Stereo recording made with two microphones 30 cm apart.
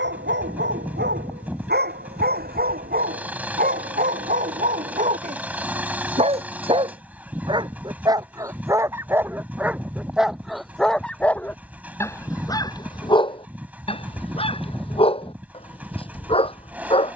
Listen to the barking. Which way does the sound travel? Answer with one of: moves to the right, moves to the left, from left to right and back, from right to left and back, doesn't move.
moves to the left.